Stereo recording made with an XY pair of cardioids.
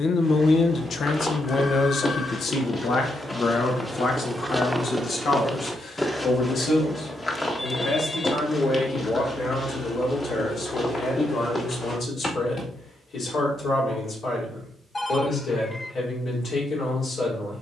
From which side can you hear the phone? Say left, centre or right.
left.